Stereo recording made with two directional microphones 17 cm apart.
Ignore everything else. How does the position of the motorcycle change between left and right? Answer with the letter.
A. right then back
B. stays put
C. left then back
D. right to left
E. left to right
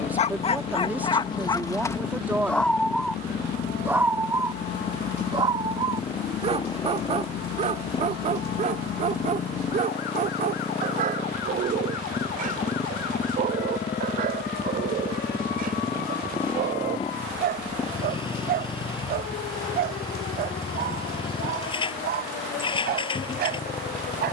B.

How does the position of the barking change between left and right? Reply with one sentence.
You can hear the barking go from the left side to the right.